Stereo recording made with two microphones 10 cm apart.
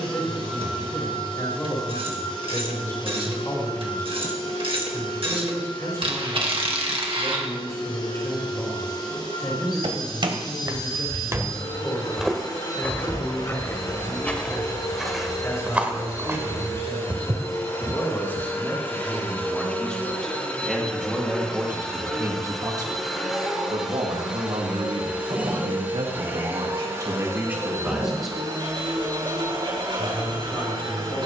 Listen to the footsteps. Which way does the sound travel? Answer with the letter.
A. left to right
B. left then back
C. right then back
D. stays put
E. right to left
B.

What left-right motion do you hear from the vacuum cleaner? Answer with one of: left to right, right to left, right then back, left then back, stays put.
left to right.